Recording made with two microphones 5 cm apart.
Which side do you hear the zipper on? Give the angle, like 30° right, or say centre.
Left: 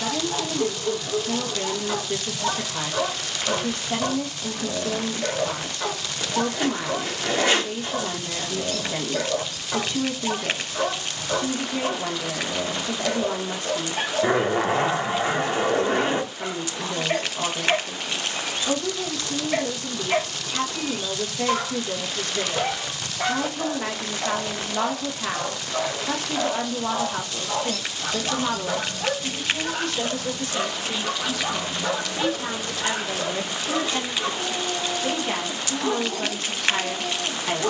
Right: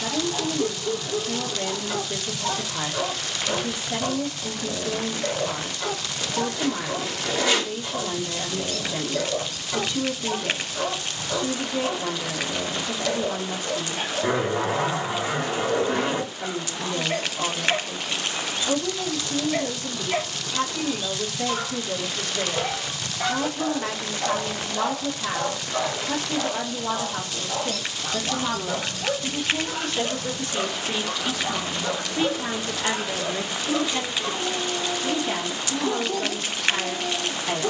40° left.